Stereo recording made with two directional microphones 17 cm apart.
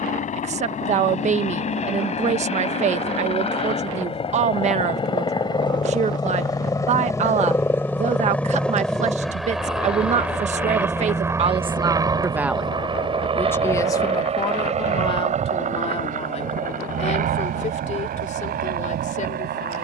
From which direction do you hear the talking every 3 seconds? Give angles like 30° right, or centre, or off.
40° right, 40° right, 40° right, 40° right, 10° left, 40° left, 50° left.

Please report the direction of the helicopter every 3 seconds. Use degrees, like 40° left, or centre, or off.
40° left, 30° left, 10° left, 10° right, 30° right, 50° right, 60° right.